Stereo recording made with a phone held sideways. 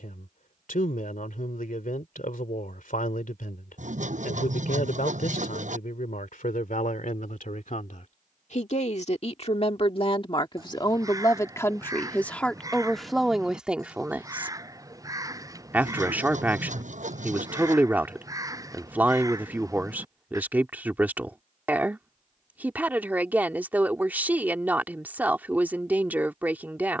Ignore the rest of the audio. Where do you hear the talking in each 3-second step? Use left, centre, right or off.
left, left, left, left, centre, centre, centre, centre, centre.